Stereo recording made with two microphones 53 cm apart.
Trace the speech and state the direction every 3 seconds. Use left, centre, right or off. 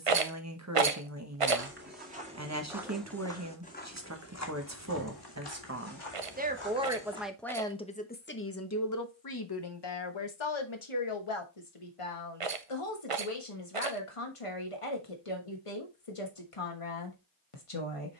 right, right, centre, left, left, left.